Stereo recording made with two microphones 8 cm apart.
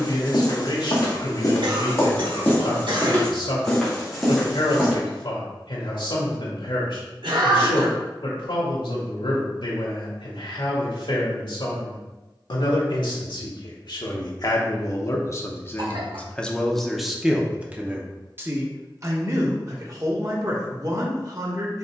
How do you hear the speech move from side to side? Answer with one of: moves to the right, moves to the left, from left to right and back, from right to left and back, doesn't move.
moves to the right.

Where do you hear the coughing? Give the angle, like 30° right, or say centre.
70° right.